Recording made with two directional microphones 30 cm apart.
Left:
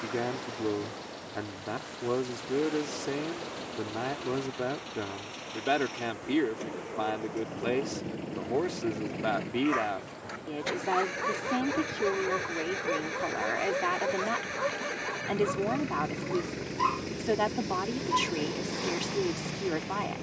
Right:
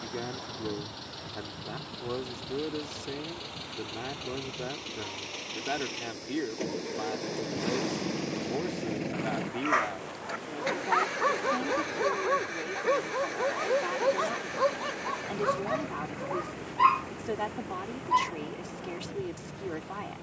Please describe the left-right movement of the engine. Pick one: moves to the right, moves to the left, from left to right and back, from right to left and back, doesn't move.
moves to the left.